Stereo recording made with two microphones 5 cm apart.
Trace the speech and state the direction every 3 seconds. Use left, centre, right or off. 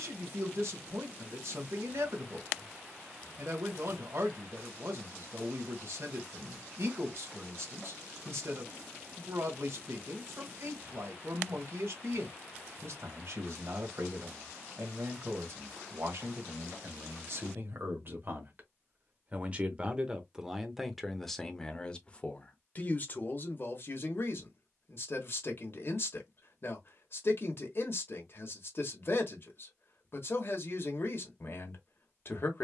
right, right, right, right, right, right, right, left, left, left, left.